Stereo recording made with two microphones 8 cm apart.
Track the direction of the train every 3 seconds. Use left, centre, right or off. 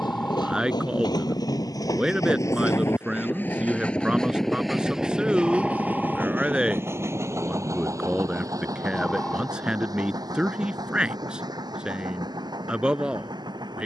left, centre, right, right, right.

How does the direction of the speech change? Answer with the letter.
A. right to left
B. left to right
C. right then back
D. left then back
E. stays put
E.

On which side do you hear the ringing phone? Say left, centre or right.
centre.